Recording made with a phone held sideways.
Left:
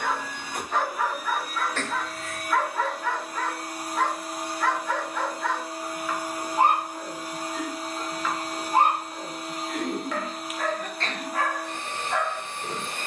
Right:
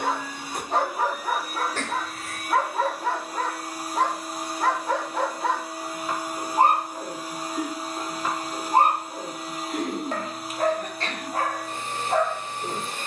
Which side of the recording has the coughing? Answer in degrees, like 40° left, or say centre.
10° right.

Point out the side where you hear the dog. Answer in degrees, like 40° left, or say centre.
30° right.